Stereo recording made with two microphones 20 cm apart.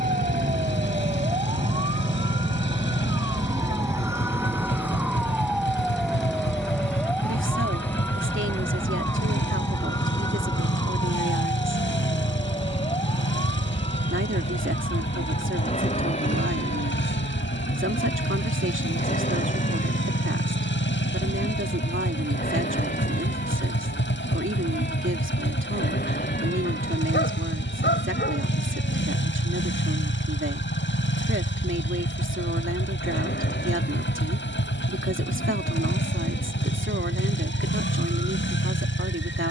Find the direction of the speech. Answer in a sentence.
In this clip you hear the speech on the right.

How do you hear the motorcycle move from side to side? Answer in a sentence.
In this clip you hear the motorcycle stay in one place.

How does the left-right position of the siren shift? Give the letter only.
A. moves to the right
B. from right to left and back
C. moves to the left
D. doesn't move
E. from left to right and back
C.